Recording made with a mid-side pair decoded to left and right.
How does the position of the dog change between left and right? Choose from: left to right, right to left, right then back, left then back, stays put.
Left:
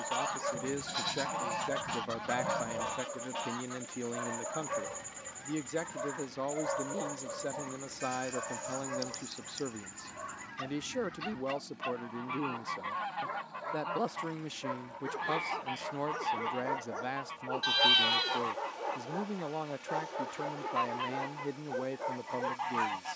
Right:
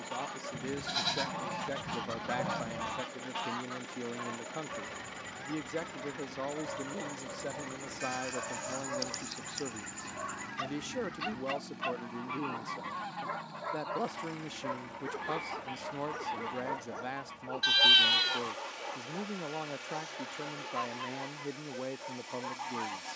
right then back.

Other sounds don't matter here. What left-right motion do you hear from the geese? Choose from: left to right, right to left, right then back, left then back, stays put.
right then back.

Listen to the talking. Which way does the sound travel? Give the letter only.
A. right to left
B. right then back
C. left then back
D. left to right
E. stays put
E.